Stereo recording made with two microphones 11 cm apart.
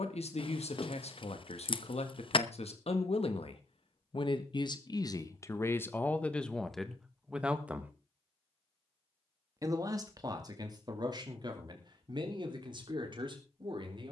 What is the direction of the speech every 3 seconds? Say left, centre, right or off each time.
left, left, centre, right, right.